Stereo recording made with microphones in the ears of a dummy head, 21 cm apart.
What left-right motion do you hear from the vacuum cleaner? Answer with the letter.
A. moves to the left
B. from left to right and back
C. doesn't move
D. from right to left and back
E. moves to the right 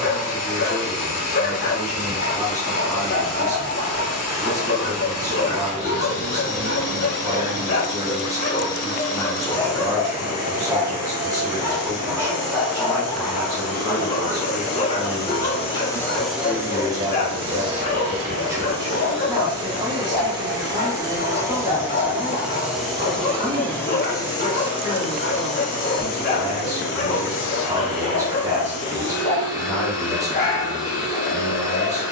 B.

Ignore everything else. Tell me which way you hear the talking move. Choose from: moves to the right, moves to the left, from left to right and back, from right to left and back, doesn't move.
doesn't move.